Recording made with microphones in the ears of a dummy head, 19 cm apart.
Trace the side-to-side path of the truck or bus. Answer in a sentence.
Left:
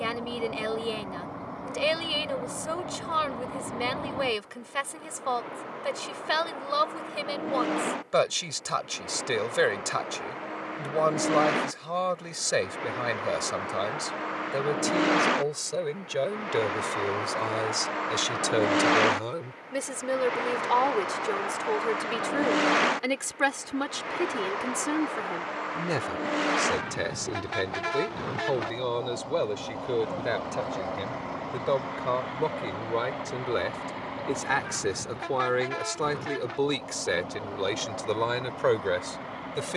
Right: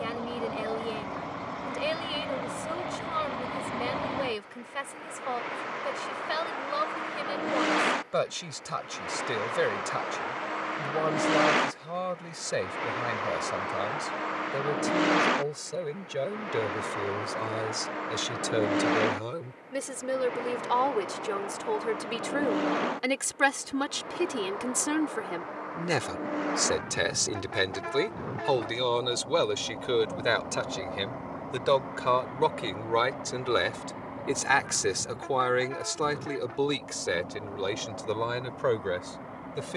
In this clip you hear the truck or bus travel towards the left.